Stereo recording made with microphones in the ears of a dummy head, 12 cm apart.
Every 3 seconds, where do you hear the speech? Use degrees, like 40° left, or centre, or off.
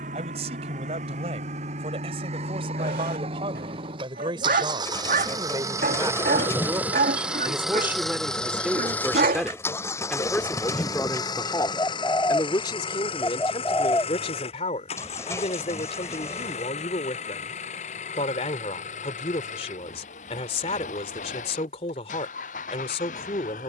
40° right, 30° right, 20° right, 10° left, 40° left, 40° left, 40° left, 40° left.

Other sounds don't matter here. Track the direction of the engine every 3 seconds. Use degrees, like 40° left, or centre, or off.
60° right, 40° right, centre, 30° left, 40° left, 50° left, 60° left, 70° left.